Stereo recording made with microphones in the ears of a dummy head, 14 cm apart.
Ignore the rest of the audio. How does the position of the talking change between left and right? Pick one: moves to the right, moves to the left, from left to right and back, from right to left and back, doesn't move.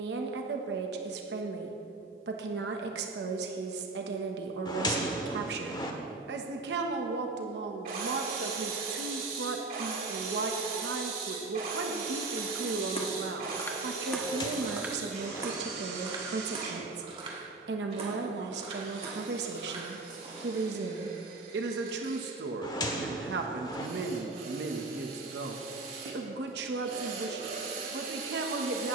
doesn't move.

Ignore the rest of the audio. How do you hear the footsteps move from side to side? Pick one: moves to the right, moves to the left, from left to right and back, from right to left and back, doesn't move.
moves to the right.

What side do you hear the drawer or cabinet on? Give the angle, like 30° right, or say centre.
30° left.